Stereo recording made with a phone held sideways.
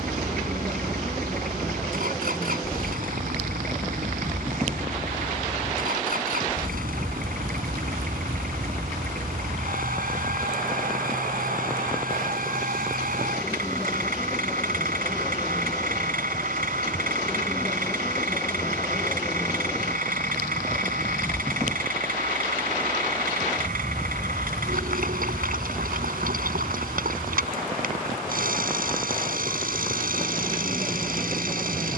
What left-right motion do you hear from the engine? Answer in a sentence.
You can hear the engine stay in one place.